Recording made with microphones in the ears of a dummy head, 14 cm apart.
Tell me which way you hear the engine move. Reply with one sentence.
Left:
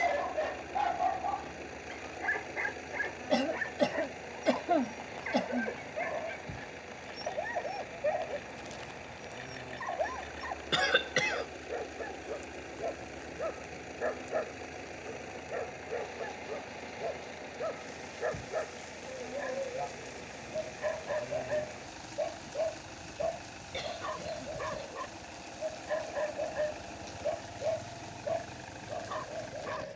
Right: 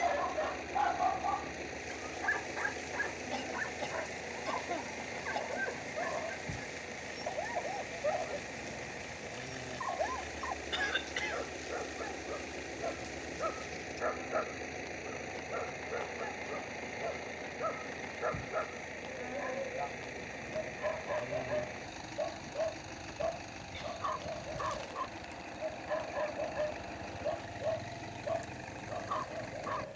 In this clip you hear the engine stay in one place.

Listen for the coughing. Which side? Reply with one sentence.
In this clip you hear the coughing on the left.